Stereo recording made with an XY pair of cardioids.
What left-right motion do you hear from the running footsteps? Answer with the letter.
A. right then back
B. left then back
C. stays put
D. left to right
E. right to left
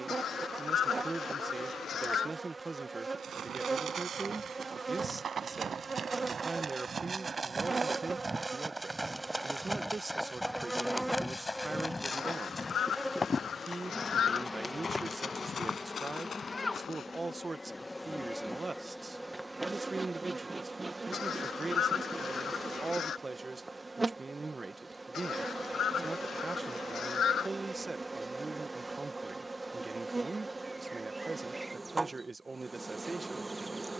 E.